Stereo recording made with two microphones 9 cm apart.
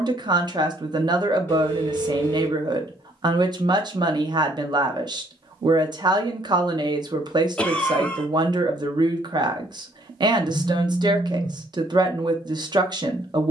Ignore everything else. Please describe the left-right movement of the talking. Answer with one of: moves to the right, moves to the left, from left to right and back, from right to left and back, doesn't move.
doesn't move.